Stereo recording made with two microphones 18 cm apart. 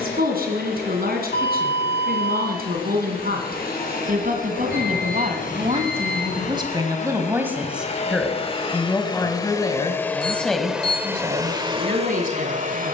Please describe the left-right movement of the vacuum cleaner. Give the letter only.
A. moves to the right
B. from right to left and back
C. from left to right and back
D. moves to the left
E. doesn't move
A.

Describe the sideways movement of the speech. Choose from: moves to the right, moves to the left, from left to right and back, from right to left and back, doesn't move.
from right to left and back.